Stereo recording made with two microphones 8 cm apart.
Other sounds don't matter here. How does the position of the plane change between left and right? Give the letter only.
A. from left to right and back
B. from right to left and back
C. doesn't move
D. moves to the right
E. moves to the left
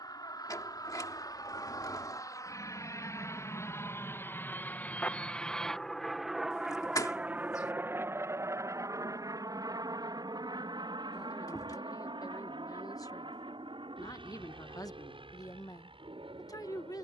D.